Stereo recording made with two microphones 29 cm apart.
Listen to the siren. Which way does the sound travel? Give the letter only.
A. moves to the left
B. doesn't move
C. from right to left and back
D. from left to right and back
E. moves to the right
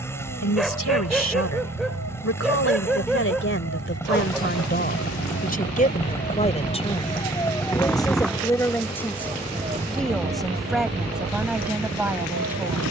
E.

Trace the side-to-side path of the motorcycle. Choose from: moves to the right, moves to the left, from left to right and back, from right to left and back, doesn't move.
doesn't move.